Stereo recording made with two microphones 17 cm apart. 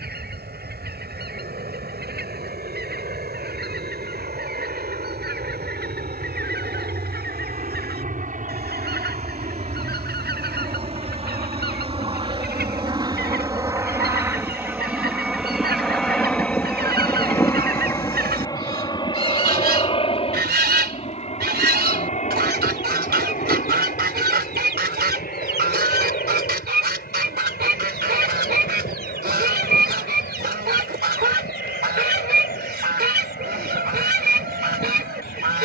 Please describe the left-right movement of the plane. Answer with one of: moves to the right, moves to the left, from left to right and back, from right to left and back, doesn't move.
moves to the left.